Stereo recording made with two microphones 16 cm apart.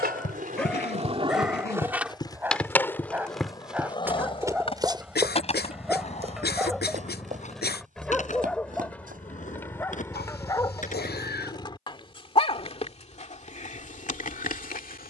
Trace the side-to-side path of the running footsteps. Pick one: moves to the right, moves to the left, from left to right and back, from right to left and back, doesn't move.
moves to the right.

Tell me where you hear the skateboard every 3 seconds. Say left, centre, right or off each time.
right, left, left, left, off.